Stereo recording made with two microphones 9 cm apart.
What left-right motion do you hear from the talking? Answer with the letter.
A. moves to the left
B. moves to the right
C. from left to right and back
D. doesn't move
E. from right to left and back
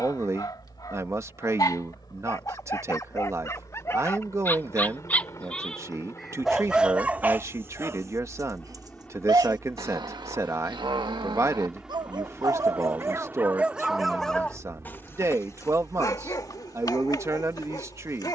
D.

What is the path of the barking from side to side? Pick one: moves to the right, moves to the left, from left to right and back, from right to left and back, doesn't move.
from left to right and back.